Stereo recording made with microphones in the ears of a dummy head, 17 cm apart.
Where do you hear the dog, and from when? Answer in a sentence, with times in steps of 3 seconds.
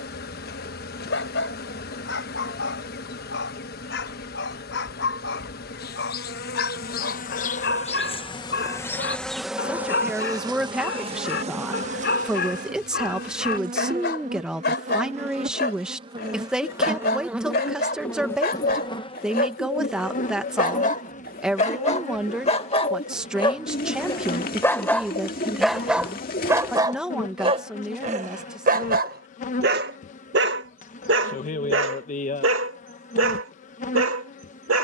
In this clip you hear the dog on the left from 0 s, in the centre from 24 s and on the right from 27 s.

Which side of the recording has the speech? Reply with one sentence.
You can hear the speech in the centre.